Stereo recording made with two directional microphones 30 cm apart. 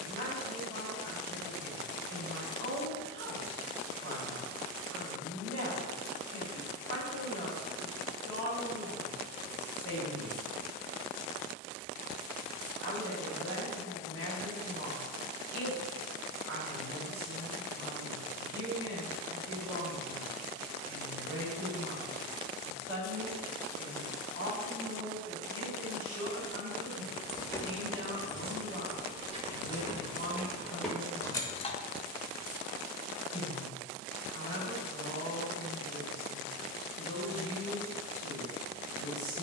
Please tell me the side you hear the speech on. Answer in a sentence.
In this clip you hear the speech on the right.